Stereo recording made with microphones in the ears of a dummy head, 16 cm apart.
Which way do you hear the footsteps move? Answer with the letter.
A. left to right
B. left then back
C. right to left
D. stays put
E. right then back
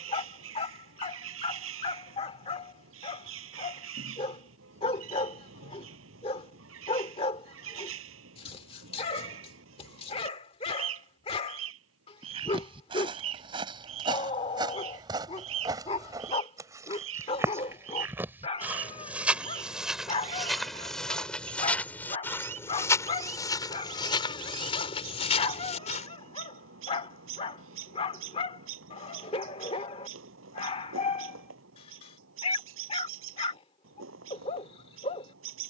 C.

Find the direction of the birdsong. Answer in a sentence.
You can hear the birdsong on the right.